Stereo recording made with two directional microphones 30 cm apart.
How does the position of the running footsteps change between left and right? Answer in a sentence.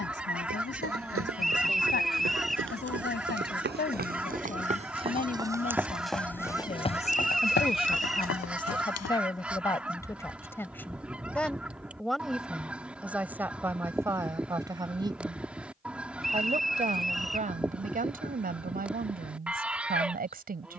You can hear the running footsteps move to the left.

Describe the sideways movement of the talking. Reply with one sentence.
In this clip you hear the talking go from the left side to the right.